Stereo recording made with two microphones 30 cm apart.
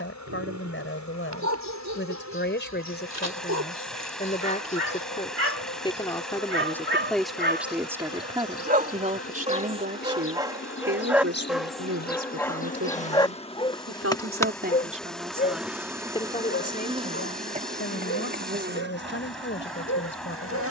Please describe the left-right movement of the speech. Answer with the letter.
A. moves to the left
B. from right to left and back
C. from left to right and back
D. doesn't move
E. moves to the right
C.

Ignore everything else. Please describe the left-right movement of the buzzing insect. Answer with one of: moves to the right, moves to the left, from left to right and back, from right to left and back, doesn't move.
moves to the right.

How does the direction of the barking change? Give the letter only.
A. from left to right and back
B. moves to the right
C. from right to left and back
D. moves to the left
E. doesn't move
D.